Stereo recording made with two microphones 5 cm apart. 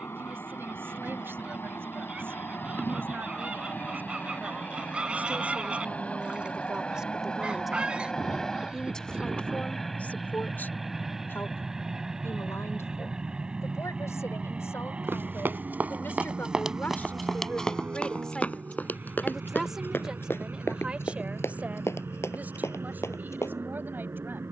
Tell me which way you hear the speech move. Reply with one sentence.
You can hear the speech go left and come back.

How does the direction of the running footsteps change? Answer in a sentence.
You can hear the running footsteps travel towards the left.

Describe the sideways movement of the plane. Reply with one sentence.
In this clip you hear the plane travel towards the right.